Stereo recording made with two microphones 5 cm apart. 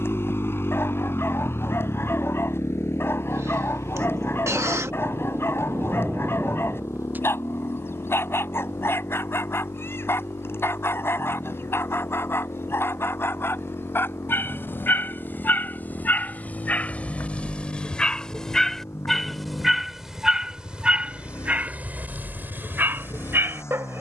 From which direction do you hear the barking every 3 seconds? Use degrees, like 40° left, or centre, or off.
50° left, 50° left, 50° left, 50° left, 50° left, 30° left, centre, 40° right.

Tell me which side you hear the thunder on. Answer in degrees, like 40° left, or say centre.
40° right.